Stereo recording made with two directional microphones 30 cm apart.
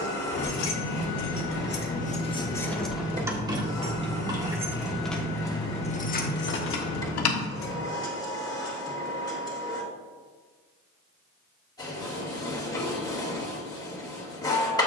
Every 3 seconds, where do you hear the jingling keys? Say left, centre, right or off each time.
left, centre, left, off, off.